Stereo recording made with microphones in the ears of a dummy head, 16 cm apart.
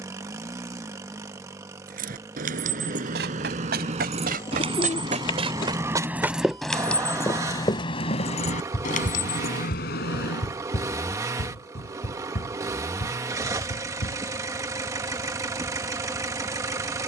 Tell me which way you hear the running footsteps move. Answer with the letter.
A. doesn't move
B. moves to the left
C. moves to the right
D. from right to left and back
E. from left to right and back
B.